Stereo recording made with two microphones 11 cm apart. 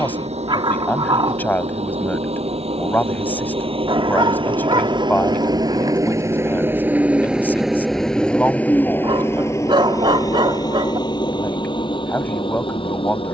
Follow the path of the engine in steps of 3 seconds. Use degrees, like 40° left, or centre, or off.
70° right, 50° right, 10° right, 30° left, 50° left.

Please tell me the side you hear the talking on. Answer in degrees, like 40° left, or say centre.
20° left.